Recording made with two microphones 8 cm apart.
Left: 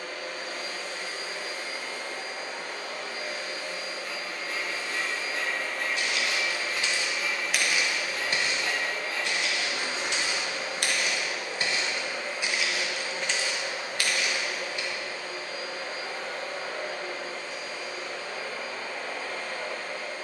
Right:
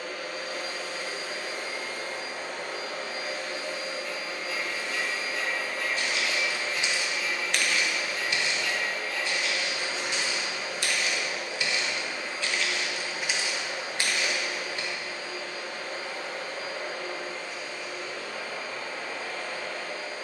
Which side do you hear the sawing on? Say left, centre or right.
left.